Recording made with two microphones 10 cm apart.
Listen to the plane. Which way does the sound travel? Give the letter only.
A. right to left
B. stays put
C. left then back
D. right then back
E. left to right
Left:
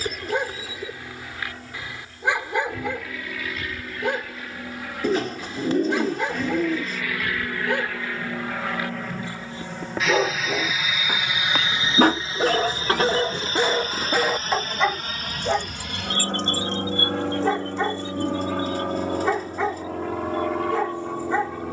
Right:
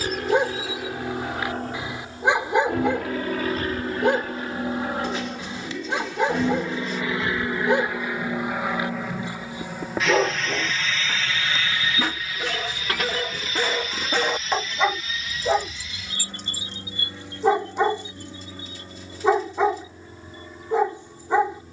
A.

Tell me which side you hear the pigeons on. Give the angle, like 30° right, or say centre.
50° left.